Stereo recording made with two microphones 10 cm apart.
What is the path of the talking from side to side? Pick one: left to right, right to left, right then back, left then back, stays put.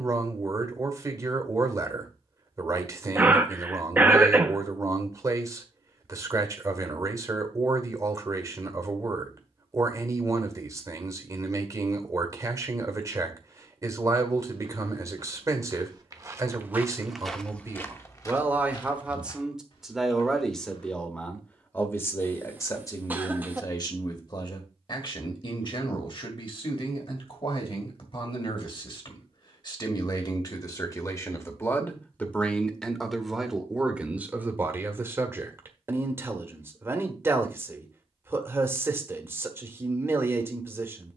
left then back.